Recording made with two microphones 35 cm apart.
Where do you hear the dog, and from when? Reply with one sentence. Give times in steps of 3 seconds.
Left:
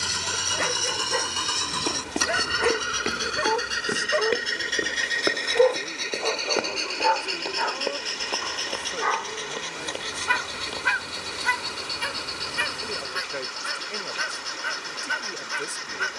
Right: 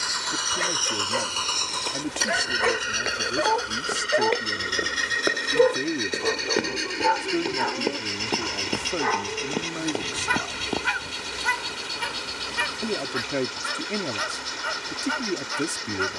In this clip you hear the dog on the left from 0 s, in the centre from 3 s and on the right from 6 s.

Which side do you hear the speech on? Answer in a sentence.
In this clip you hear the speech on the right.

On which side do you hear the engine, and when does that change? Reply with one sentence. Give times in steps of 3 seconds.
You can hear the engine on the left from 0 s, in the centre from 3 s and on the right from 6 s.